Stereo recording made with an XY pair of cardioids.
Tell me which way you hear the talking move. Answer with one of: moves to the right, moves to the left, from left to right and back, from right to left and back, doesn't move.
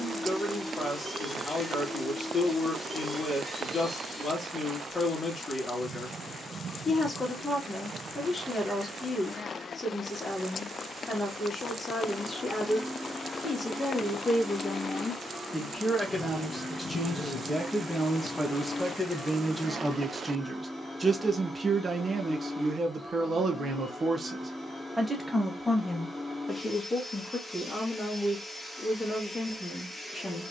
from left to right and back.